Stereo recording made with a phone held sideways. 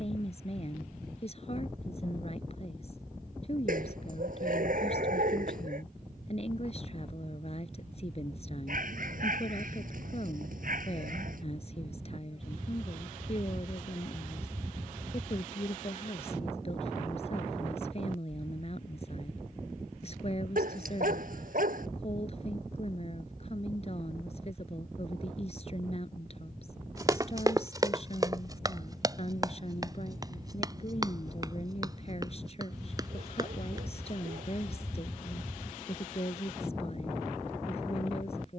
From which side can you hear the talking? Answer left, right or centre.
left.